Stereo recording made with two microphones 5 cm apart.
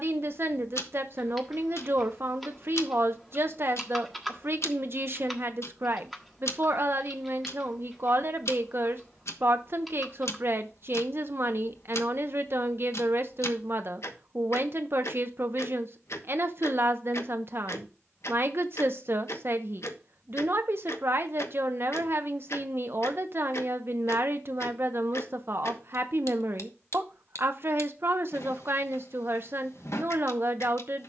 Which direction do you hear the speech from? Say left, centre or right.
right.